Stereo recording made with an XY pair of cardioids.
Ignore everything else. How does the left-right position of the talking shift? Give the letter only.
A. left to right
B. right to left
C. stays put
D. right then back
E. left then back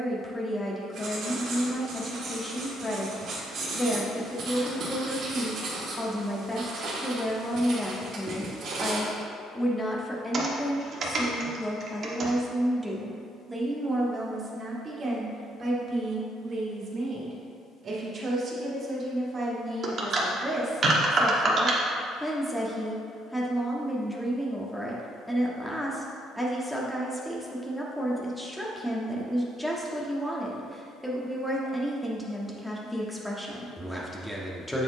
D.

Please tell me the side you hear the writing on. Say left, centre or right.
right.